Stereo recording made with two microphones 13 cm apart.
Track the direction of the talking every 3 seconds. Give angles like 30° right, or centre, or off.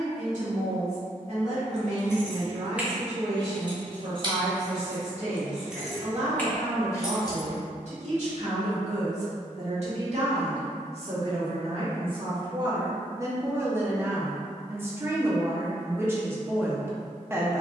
60° right, 60° right, 60° right, 50° right, 20° right, 20° right.